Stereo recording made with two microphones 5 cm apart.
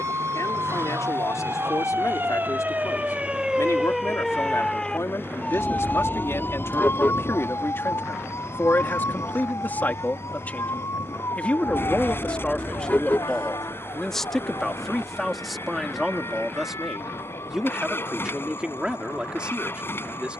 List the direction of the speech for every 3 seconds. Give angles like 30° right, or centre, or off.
70° left, 60° left, 50° left, 30° left, 10° left, centre, 20° right.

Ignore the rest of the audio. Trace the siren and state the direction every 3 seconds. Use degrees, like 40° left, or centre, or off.
50° right, 10° left, 50° left, 60° left, 70° left, 70° left, 80° left.